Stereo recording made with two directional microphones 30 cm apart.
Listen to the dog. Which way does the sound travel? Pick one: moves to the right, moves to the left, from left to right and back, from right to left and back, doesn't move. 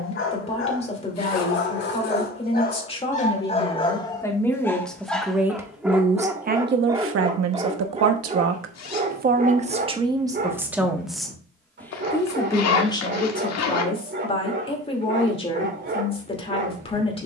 moves to the right.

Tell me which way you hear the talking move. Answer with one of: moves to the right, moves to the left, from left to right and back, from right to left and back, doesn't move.
from left to right and back.